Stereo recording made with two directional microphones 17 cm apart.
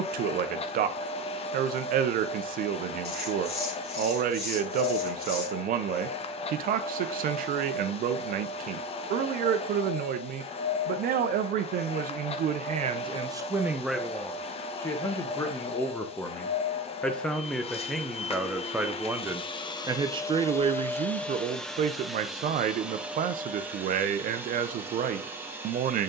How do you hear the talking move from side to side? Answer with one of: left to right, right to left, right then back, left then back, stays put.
left then back.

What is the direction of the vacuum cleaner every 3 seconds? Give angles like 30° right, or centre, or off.
40° left, 40° left, 40° left, 40° left, 40° left, 40° left, 30° left, centre, 10° right.